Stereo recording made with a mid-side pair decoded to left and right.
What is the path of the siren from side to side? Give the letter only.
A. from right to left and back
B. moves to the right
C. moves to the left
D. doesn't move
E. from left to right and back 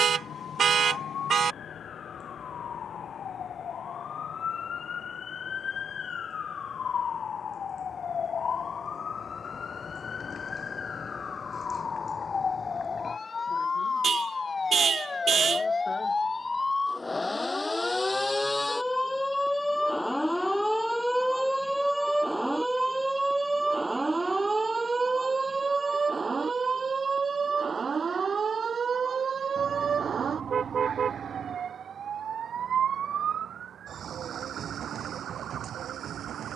B.